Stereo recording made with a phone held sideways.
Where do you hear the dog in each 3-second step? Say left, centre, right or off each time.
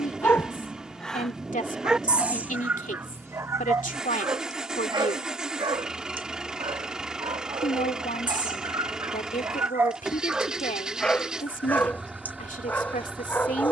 centre, right, right, centre, centre.